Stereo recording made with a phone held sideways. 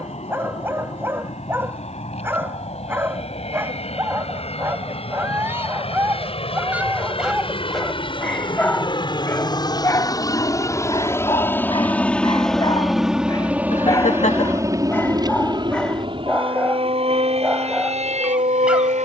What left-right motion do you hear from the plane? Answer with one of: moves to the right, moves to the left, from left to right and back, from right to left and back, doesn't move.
moves to the right.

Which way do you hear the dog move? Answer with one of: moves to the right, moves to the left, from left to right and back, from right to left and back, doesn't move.
from right to left and back.